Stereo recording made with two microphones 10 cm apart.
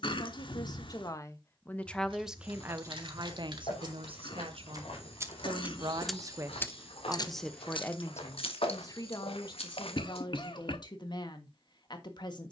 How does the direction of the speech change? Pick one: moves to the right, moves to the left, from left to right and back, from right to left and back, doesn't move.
from left to right and back.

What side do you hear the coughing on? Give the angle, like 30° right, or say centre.
60° left.